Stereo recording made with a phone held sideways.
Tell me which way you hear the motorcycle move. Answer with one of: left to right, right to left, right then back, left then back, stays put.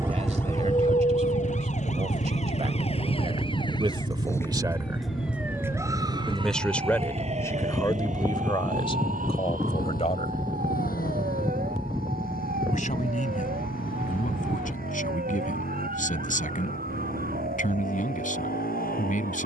right to left.